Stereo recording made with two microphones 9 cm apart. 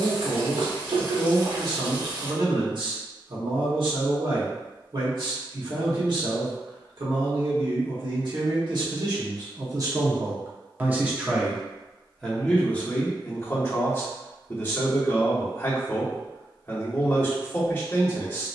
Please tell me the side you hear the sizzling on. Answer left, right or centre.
right.